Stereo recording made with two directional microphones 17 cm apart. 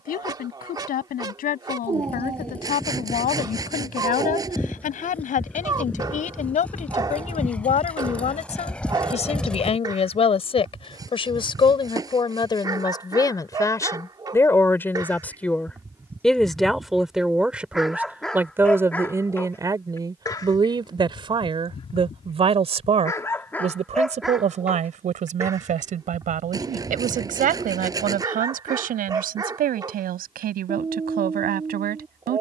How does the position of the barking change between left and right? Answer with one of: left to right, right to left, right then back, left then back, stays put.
left then back.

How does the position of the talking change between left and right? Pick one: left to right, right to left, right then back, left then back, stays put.
left to right.